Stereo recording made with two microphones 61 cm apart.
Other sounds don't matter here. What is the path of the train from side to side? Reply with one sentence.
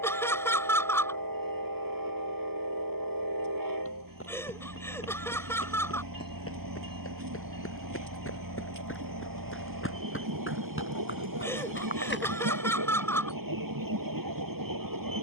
You can hear the train stay in one place.